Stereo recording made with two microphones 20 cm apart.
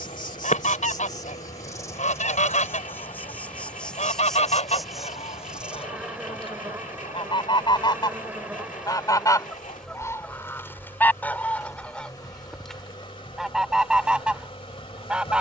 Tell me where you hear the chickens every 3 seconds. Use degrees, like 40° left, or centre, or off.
40° left, 30° left, 20° left, 10° left, centre.